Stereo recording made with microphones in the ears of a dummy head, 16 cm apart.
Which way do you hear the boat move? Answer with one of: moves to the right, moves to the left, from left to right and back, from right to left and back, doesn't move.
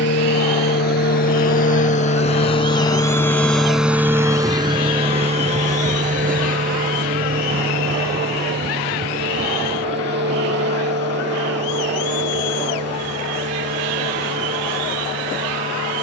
moves to the right.